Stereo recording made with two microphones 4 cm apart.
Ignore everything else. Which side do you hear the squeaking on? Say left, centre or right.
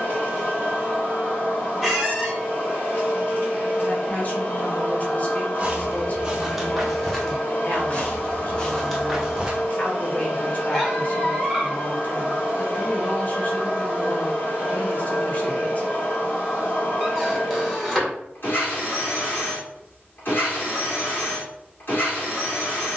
centre.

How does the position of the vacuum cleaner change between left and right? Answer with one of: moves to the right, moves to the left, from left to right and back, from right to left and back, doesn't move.
doesn't move.